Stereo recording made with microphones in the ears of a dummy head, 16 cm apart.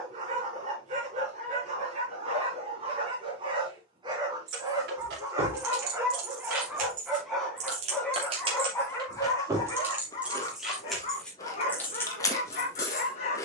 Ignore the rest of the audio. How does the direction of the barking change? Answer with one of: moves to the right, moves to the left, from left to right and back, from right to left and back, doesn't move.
moves to the left.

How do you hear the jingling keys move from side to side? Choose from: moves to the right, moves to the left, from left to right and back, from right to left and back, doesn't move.
moves to the left.